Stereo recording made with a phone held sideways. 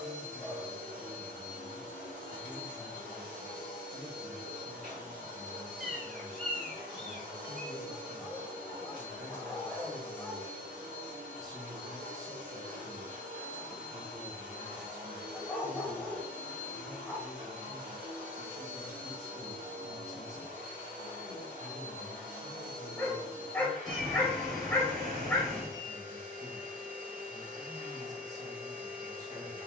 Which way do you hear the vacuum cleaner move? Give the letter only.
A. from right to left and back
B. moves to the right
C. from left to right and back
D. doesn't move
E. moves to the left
D.